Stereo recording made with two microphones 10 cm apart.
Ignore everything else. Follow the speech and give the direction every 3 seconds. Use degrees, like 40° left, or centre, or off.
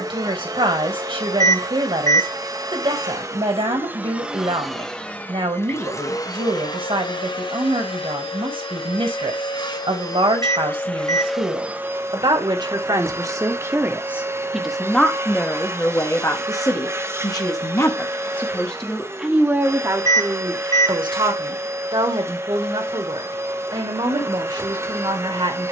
60° right, 60° right, 60° right, 60° right, 30° right, 30° left, 20° right, 50° right, 50° right.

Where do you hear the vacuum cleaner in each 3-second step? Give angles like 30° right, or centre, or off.
40° right, centre, 50° left, 20° left, 30° right, 30° right, 30° right, 30° right, 30° right.